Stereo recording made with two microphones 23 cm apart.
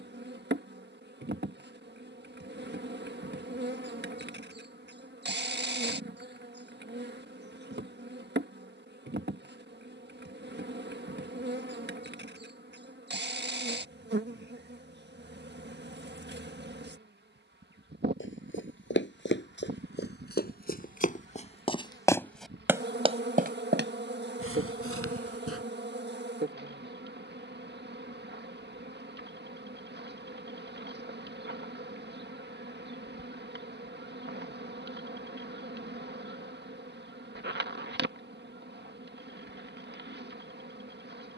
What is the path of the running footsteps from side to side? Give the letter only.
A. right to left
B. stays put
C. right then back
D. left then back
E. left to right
E.